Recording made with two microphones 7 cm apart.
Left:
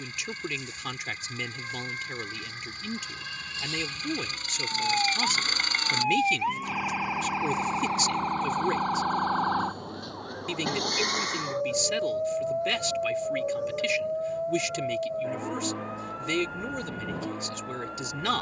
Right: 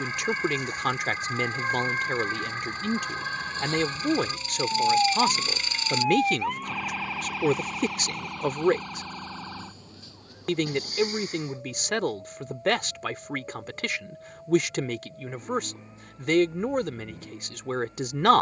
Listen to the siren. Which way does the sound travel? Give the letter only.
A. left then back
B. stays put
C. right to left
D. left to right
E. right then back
C.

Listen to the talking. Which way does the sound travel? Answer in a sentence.
In this clip you hear the talking stay put.